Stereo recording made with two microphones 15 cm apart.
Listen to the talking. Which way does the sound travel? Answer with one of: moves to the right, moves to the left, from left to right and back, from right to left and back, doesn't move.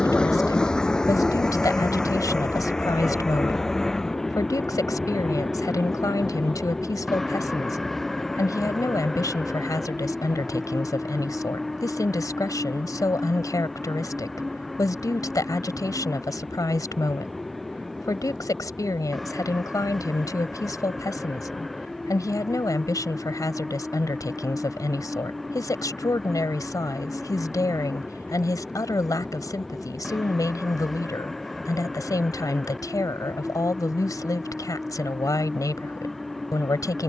doesn't move.